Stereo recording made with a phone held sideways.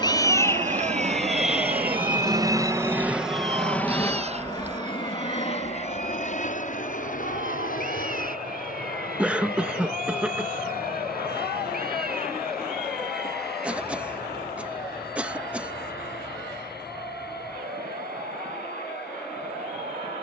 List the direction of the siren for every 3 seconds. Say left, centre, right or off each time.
centre, right, right, right, right, right, right.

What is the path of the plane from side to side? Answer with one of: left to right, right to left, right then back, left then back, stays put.
right to left.